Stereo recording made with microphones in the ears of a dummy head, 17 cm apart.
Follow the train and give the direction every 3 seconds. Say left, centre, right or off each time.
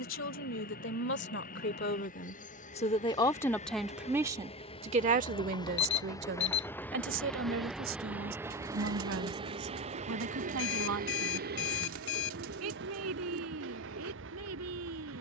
left, left, centre, right, right.